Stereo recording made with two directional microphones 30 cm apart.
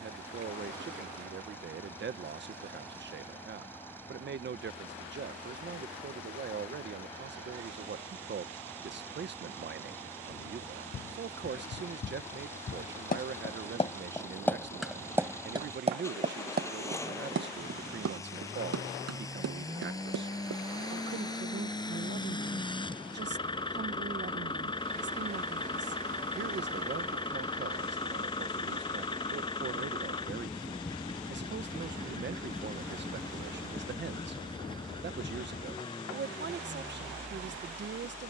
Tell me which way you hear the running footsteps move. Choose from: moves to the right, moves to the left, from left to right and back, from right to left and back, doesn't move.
moves to the right.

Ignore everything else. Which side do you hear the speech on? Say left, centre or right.
right.